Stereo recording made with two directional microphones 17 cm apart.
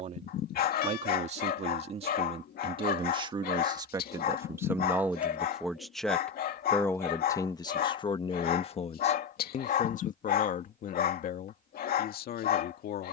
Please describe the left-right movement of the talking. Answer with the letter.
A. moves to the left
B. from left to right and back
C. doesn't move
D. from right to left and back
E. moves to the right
A.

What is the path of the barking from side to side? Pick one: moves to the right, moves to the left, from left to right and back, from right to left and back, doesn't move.
doesn't move.